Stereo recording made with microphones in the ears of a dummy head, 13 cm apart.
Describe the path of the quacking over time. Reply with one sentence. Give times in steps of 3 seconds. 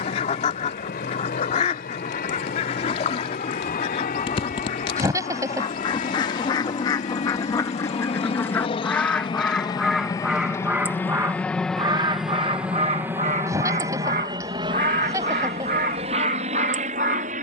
You can hear the quacking on the left from 0 s, in the centre from 9 s and on the right from 12 s.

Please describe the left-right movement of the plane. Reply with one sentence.
You can hear the plane travel towards the right.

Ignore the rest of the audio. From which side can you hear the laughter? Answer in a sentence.
In this clip you hear the laughter on the right.